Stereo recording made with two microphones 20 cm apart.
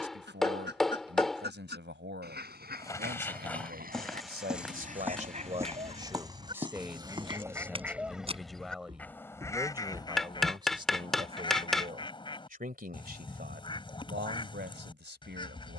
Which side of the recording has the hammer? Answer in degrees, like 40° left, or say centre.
centre.